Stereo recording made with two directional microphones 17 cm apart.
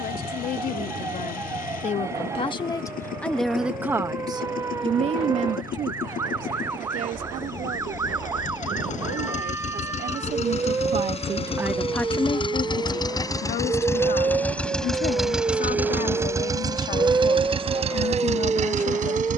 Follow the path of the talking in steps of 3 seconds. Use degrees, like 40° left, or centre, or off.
50° left, 30° right, 60° right, 40° right, 50° left, 60° left, 60° left.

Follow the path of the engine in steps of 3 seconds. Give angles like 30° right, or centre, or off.
60° left, 60° left, 50° left, 40° left, 20° left, 20° right, 50° right.